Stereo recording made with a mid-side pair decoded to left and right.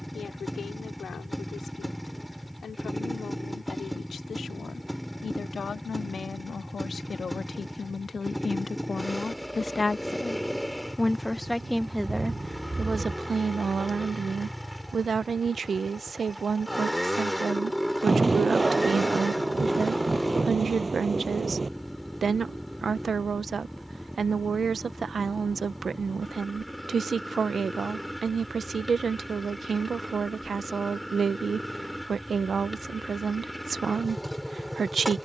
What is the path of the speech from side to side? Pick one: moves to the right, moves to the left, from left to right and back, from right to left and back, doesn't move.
moves to the right.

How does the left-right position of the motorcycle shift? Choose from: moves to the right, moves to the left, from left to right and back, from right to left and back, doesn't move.
doesn't move.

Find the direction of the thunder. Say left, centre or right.
right.